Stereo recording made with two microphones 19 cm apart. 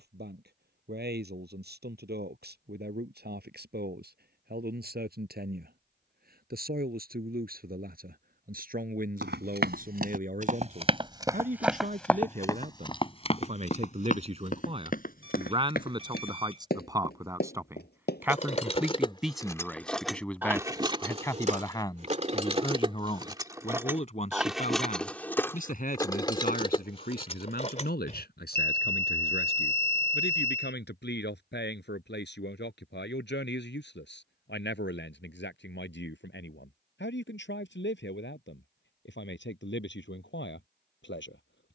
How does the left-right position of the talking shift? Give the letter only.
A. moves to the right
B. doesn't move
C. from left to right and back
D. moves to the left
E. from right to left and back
D.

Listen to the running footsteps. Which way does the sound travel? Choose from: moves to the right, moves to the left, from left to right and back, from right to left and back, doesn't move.
moves to the left.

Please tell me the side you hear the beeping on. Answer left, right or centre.
right.